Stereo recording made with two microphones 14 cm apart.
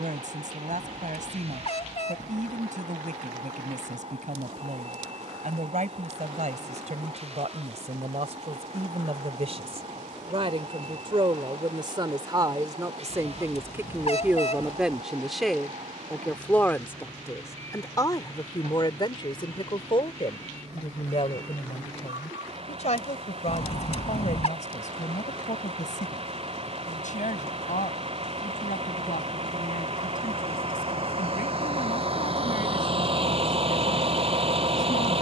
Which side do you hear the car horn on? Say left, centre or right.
left.